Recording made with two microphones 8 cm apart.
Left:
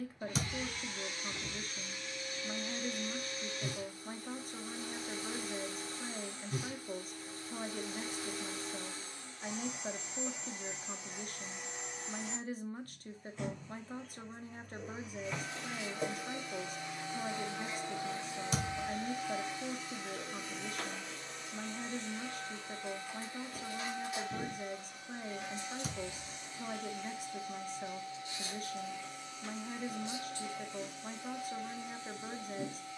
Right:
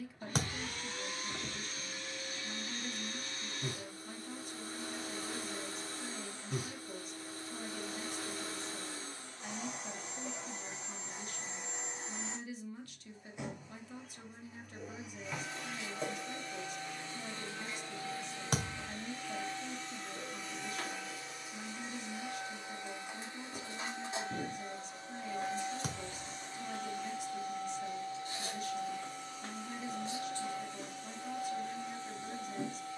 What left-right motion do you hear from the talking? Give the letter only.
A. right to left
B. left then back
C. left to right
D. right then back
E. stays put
E.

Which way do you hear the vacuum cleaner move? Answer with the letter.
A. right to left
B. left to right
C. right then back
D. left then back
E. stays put
D.